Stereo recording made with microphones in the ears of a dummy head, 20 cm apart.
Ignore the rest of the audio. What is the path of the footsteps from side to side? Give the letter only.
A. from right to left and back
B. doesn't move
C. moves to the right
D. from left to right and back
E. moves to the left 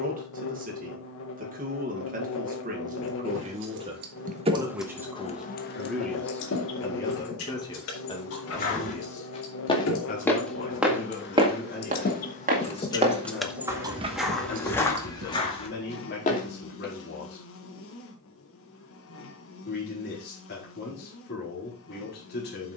D.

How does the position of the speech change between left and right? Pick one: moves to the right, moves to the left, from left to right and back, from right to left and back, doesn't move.
moves to the left.